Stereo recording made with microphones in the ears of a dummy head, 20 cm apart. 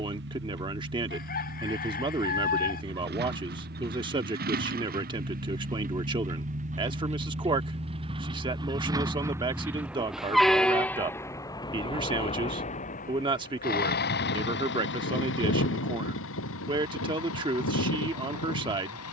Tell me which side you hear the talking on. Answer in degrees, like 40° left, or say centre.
20° right.